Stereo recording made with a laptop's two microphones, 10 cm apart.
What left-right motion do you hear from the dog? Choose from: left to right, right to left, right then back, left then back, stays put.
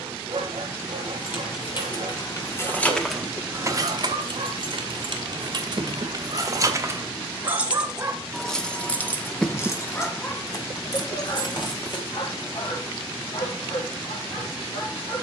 right to left.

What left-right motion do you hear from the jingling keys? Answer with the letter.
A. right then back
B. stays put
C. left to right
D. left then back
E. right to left
A.